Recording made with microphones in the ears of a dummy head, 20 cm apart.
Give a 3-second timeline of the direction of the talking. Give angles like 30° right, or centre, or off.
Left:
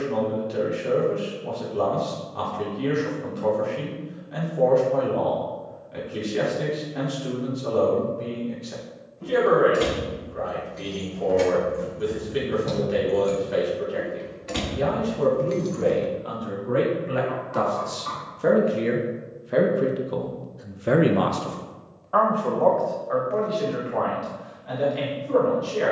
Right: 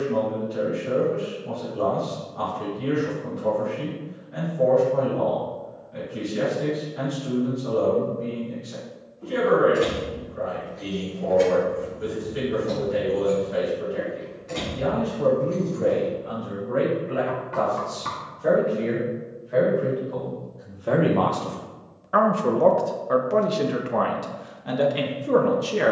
80° left, 80° left, 80° left, 80° left, 80° left, 70° left, 50° left, 30° right, 60° right.